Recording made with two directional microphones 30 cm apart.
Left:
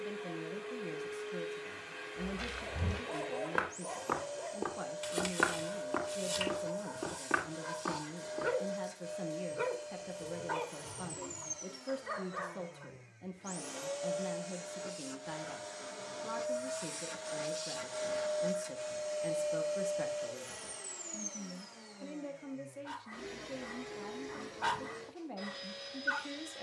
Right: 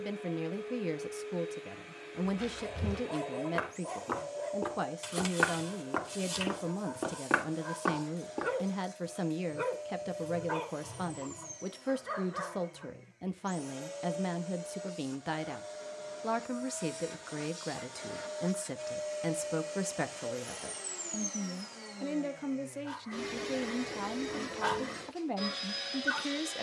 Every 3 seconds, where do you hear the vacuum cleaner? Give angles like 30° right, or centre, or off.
60° left, 60° left, 60° left, 60° left, 50° left, 40° left, centre, 40° right, 60° right.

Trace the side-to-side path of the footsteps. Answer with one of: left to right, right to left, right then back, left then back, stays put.
left to right.